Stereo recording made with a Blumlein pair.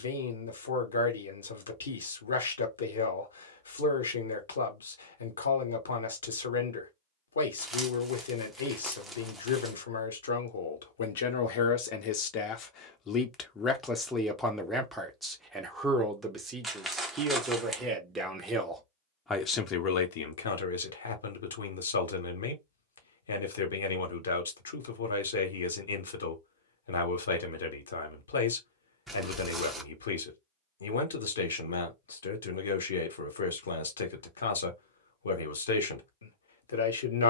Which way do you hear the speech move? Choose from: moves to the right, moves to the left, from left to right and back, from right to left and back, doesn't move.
from left to right and back.